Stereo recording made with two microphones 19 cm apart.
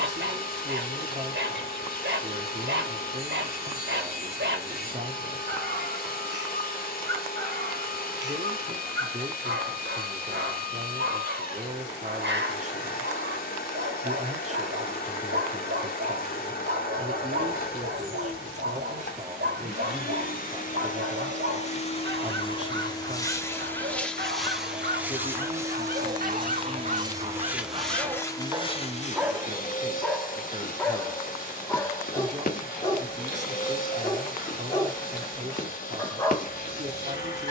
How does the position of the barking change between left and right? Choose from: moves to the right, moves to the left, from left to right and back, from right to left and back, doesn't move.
moves to the left.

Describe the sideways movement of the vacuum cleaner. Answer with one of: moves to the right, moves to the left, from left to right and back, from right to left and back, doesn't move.
from left to right and back.